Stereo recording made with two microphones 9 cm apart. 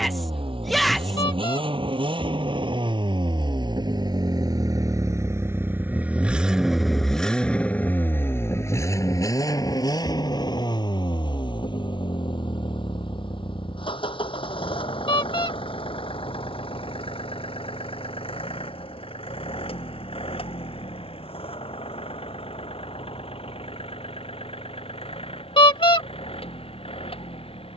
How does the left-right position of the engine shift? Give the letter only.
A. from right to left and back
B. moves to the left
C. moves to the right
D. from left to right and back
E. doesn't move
B.